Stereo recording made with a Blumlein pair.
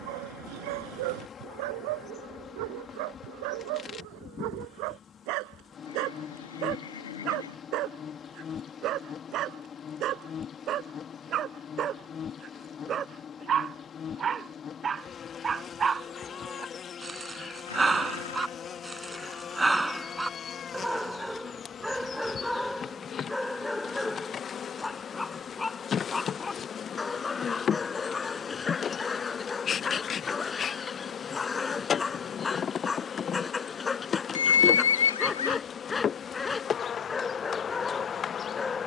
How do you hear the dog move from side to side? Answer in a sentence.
You can hear the dog move to the left.